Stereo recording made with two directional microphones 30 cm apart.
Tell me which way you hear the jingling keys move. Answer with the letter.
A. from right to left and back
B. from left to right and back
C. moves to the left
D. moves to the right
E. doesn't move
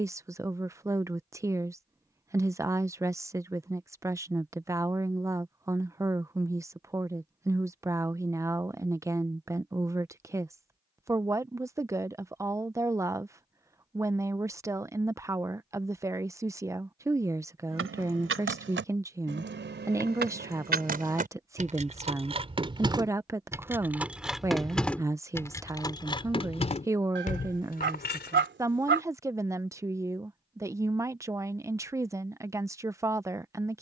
C.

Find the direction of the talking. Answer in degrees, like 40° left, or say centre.
10° right.